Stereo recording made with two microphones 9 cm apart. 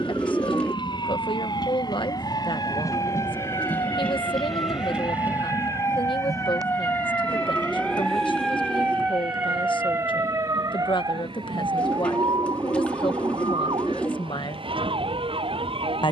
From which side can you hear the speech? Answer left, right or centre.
left.